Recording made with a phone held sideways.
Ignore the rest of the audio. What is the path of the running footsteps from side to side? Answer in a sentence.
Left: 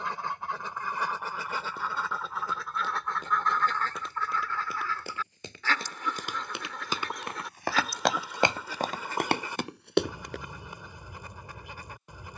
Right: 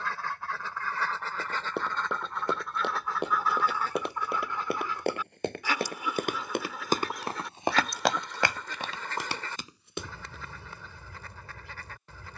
In this clip you hear the running footsteps move to the left.